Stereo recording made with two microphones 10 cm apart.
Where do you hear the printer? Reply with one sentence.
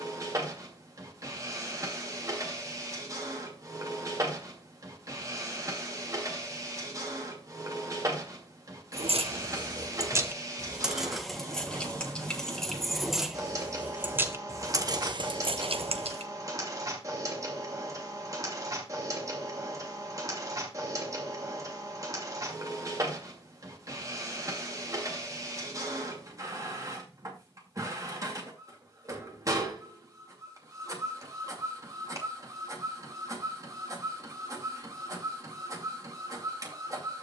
You can hear the printer on the right.